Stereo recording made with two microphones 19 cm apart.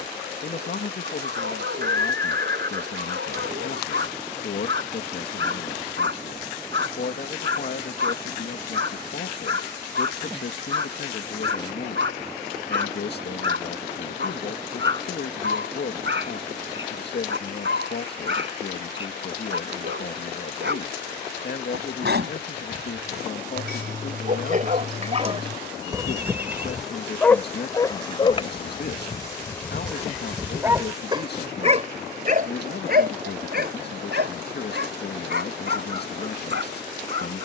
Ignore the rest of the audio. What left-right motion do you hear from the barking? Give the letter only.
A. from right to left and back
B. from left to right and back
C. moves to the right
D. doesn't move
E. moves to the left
A.